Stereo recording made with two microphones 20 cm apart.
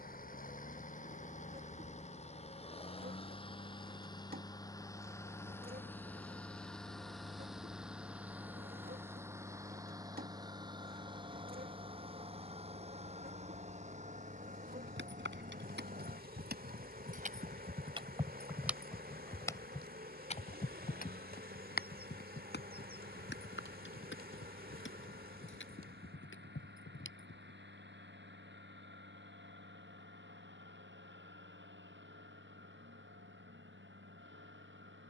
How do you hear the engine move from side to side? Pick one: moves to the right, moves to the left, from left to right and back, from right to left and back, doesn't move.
moves to the right.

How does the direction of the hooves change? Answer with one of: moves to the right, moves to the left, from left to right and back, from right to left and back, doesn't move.
moves to the left.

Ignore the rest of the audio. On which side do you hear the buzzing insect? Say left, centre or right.
right.